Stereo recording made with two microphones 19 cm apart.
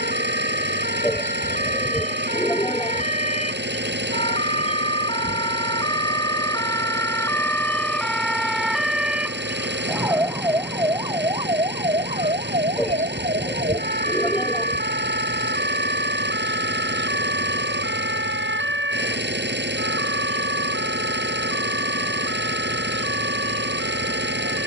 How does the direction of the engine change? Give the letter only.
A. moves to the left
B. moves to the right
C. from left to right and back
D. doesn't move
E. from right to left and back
D.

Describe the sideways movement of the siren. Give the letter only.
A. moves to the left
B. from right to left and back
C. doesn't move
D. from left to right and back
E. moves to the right
E.